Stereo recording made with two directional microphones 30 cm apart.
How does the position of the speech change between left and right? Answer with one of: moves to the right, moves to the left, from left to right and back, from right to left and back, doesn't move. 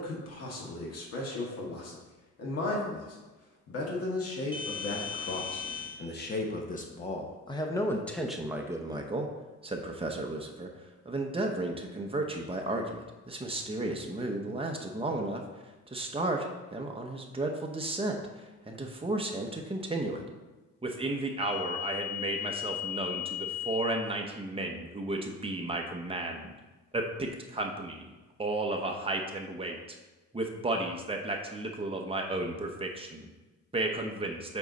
moves to the right.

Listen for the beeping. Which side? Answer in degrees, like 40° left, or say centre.
20° left.